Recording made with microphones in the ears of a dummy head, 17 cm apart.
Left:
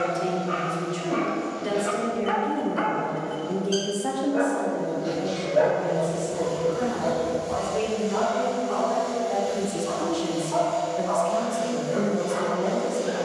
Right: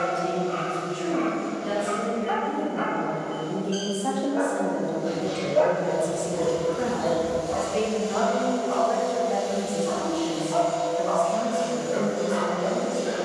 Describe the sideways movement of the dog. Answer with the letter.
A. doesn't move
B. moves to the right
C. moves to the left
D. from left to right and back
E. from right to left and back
B.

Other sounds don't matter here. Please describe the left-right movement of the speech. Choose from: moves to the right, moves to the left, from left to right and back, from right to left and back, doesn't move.
from left to right and back.